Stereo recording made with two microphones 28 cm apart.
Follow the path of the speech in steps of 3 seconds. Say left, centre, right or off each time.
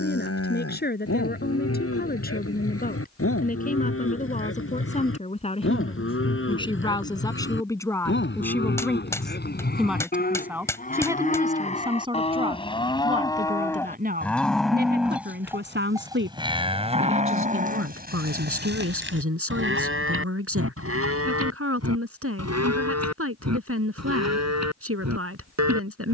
left, left, centre, centre, right, right, right, right, right.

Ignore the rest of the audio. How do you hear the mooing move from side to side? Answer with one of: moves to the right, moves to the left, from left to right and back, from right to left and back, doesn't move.
moves to the right.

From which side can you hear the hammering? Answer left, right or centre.
centre.